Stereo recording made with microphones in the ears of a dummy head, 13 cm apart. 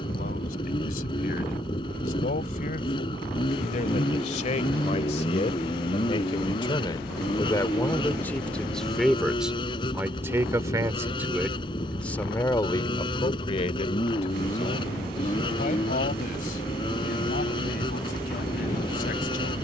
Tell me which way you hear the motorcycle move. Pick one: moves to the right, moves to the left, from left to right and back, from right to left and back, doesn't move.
doesn't move.